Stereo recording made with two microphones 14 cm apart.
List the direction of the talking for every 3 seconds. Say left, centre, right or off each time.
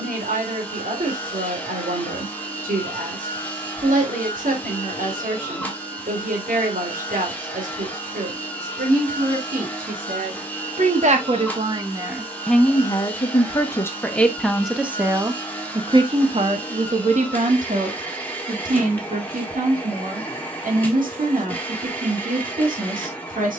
right, right, right, right, centre, right, right, right.